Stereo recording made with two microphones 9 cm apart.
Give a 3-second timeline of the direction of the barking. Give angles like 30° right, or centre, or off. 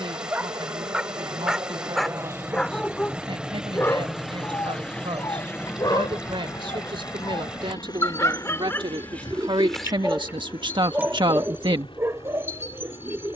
centre, 40° left, 40° left, 10° right, 40° right.